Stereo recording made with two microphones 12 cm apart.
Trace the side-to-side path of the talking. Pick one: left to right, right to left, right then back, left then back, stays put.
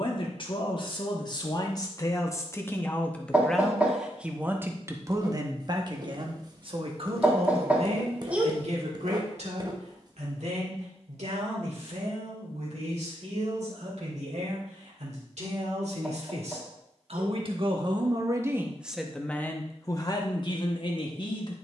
right then back.